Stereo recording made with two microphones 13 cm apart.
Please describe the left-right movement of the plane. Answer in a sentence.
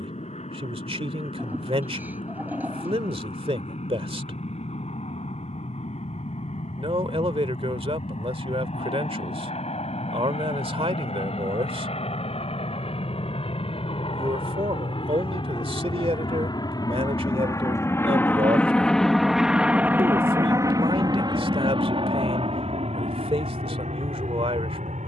In this clip you hear the plane move from left to right.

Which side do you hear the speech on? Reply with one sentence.
You can hear the speech on the right.